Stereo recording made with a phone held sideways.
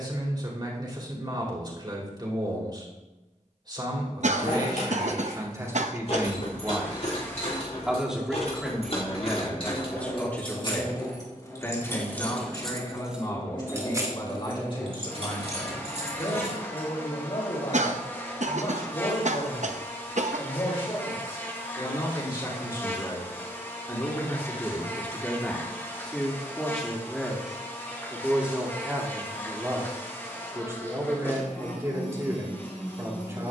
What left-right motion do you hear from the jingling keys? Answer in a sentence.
You can hear the jingling keys travel towards the right.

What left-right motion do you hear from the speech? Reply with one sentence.
In this clip you hear the speech move from right to left and back again.